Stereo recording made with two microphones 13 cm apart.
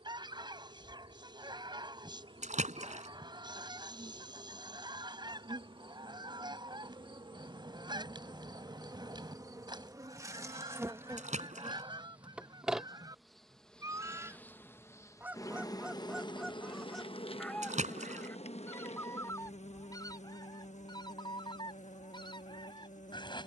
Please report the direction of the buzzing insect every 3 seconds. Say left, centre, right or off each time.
right, right, right, right, centre, left, left, left.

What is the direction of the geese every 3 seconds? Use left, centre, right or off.
right, right, right, right, right, centre, left, left.